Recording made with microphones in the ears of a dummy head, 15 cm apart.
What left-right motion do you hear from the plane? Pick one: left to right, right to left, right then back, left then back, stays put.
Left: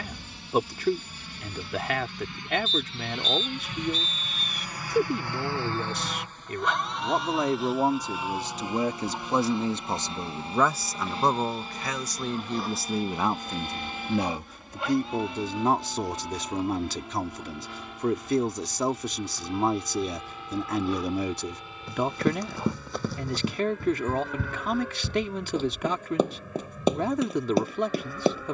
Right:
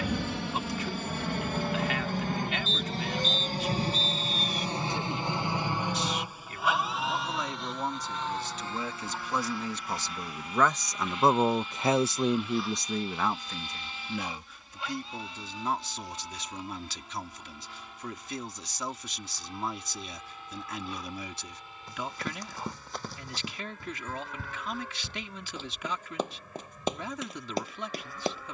right to left.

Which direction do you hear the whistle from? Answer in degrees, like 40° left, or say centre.
50° left.